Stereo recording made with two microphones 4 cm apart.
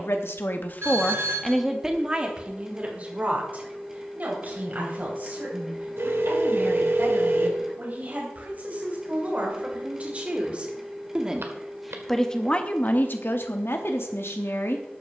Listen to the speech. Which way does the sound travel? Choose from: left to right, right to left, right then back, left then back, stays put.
right then back.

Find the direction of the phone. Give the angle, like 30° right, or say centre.
70° right.